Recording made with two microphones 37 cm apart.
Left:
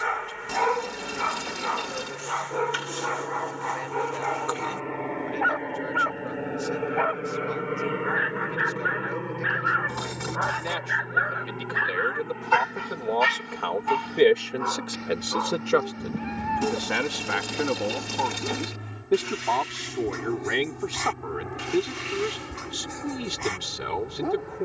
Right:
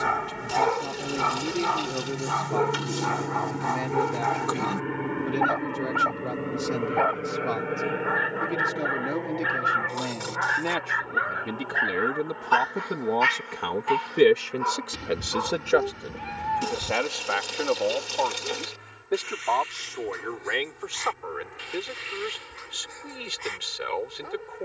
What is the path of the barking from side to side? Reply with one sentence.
You can hear the barking travel towards the left.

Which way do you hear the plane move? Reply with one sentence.
In this clip you hear the plane move to the left.